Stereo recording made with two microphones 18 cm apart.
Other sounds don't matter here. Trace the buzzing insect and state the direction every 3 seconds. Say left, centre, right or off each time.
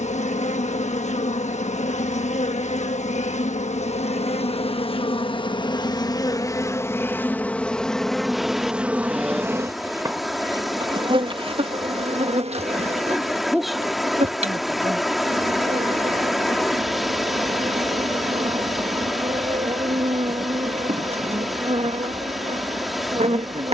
left, left, centre, right, right, right, right, right.